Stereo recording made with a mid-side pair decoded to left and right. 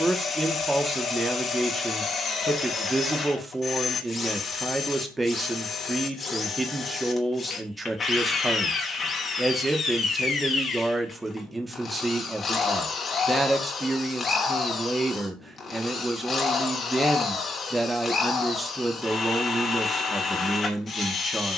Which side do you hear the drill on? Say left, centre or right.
left.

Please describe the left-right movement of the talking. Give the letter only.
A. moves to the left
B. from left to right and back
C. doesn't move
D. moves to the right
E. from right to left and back
C.